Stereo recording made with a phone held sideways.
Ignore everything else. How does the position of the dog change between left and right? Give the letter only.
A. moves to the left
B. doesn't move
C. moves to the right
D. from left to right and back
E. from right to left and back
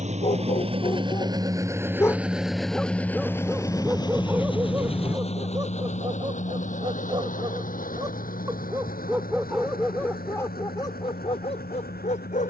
D.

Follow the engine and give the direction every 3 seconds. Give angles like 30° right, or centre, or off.
20° right, 30° left, 50° left, 60° left.